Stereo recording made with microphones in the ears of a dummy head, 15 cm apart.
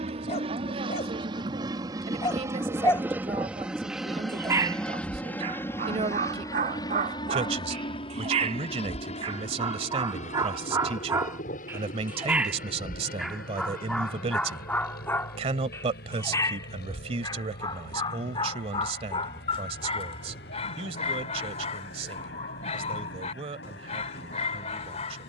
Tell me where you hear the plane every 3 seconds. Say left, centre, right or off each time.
right, centre, left, left, left, left, left, left, left.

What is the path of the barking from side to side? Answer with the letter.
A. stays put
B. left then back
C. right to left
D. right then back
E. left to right
D.